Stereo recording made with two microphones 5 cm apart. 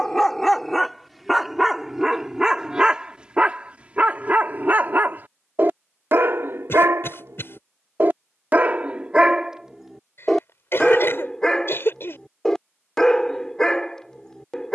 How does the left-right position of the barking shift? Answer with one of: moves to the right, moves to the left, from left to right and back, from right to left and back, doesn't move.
from left to right and back.